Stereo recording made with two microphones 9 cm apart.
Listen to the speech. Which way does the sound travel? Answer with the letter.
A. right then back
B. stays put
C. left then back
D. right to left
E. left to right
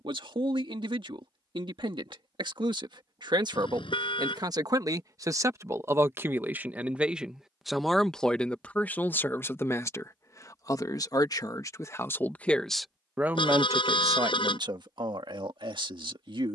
C.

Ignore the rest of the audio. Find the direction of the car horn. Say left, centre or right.
left.